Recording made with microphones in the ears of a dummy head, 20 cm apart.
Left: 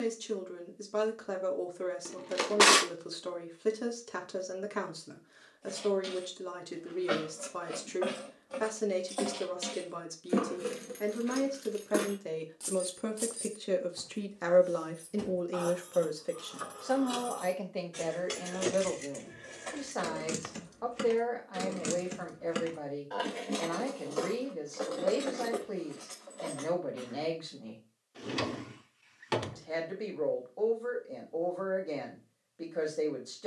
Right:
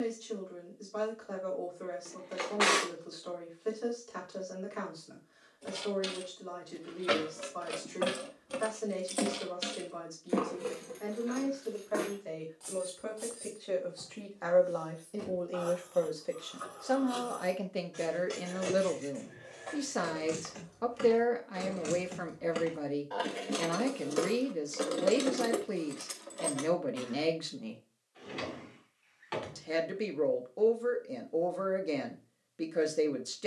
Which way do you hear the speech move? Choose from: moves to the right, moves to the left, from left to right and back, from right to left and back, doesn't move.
moves to the right.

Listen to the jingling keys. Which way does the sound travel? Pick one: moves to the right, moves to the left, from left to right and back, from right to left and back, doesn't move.
from right to left and back.